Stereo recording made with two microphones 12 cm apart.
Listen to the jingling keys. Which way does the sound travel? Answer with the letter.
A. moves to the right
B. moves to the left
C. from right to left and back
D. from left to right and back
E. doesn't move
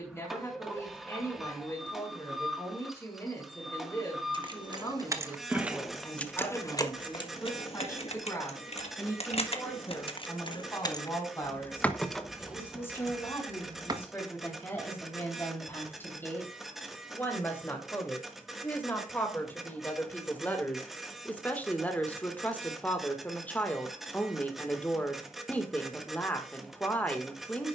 C.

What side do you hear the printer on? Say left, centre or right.
centre.